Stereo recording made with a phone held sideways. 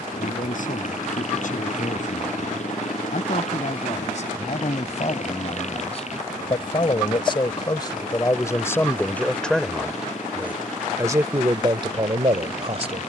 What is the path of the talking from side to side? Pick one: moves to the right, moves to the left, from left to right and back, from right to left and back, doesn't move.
moves to the right.